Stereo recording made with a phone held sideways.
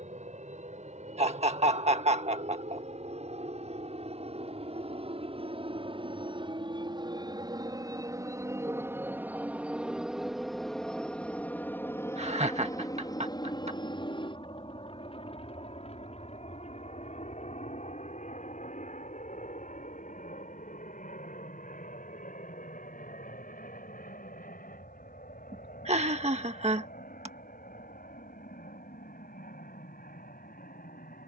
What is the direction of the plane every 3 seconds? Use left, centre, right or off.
right, right, right, centre, left, left, left, left, left, left, left.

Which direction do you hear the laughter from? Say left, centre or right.
right.